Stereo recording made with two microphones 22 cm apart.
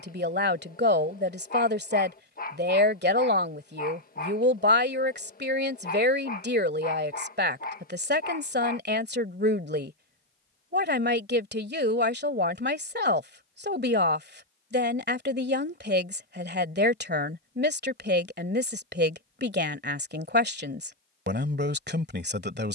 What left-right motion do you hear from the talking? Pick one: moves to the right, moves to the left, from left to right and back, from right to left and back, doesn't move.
doesn't move.